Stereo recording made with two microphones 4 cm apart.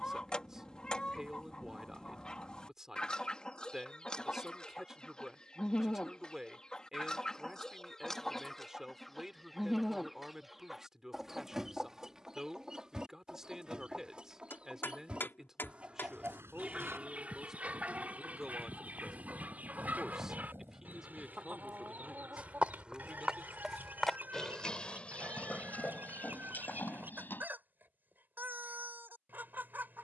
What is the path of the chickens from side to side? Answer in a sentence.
In this clip you hear the chickens travel towards the right.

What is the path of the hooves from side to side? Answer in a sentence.
In this clip you hear the hooves move from right to left.